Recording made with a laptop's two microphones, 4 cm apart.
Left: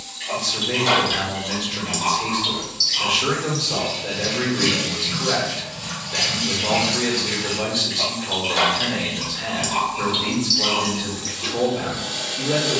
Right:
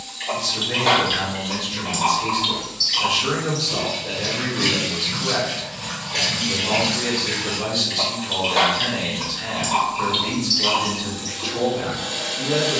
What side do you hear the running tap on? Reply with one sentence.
You can hear the running tap on the right.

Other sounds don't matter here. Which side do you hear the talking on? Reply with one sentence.
You can hear the talking on the left.